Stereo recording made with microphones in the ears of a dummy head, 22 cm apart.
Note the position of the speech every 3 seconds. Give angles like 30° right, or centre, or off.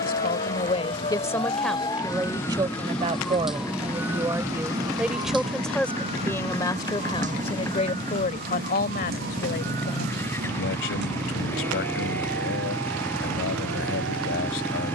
10° left, 10° right, 20° left, 50° left, 50° left.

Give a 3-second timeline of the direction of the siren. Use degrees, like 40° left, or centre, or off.
20° left, 10° right, 30° right, 40° right, 50° right.